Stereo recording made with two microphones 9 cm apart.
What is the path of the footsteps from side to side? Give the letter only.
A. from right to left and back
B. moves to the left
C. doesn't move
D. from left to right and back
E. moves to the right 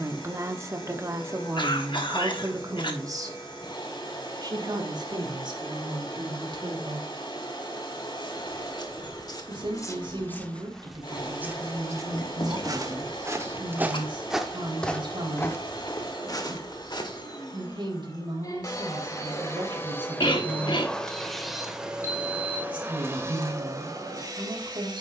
D.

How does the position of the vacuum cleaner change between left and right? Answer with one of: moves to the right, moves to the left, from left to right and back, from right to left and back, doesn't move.
moves to the right.